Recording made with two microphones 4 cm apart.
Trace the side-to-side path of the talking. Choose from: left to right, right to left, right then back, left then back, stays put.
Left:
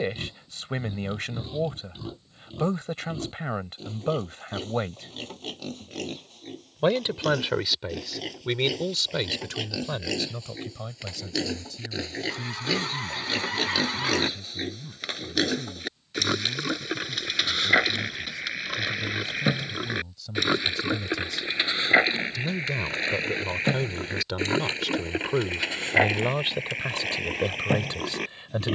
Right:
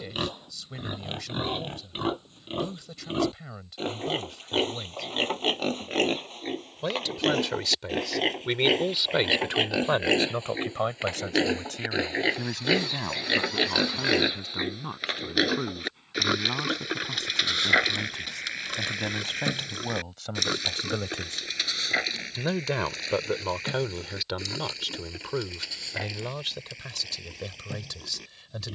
right then back.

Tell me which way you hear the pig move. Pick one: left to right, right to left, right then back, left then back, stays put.
right to left.